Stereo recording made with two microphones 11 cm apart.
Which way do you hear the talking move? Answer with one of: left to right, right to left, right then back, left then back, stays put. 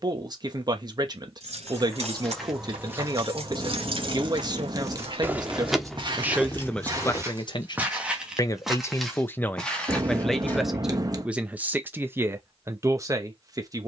left then back.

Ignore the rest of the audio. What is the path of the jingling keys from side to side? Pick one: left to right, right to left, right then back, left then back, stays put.
right to left.